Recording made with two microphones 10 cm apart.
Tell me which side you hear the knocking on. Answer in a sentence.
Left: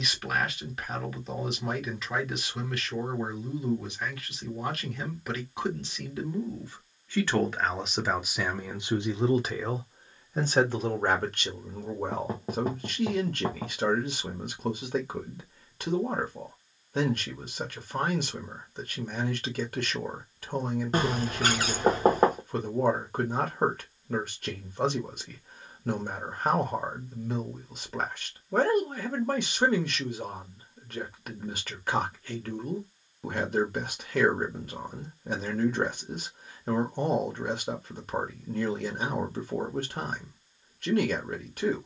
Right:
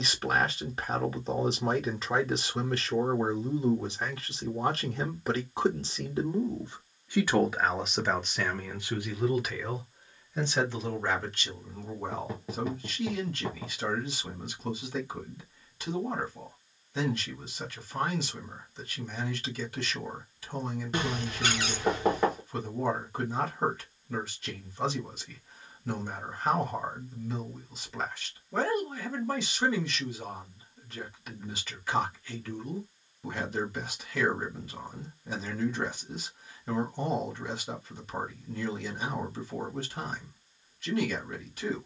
In this clip you hear the knocking on the left.